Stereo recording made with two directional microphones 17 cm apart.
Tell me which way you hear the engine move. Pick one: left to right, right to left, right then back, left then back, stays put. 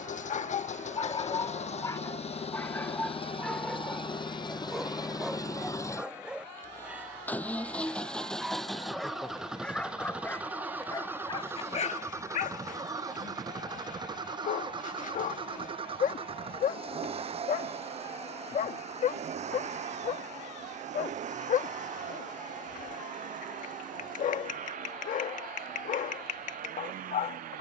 left to right.